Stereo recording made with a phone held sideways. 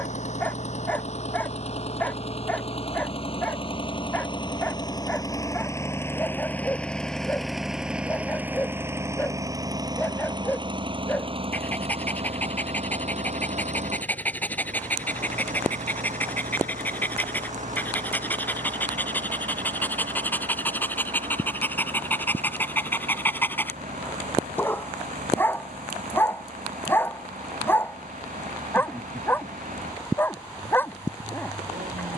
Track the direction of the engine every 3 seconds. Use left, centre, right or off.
left, left, centre, right, right, right, right, right, right, right, right.